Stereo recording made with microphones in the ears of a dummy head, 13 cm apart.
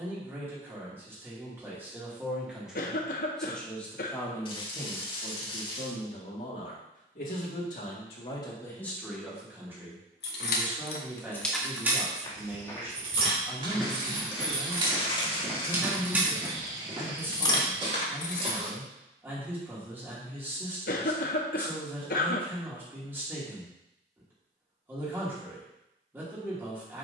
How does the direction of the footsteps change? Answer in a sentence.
In this clip you hear the footsteps go from the left side to the right.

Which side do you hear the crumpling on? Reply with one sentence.
In this clip you hear the crumpling on the left.